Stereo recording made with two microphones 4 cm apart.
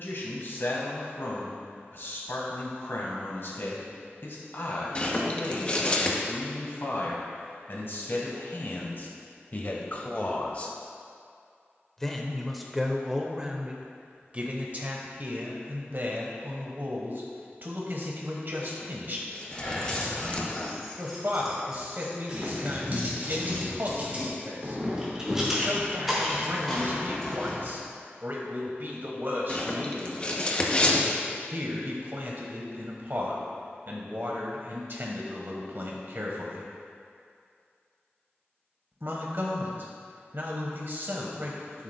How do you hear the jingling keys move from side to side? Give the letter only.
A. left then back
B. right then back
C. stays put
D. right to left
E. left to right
B.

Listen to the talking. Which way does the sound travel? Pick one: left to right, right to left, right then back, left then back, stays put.
left to right.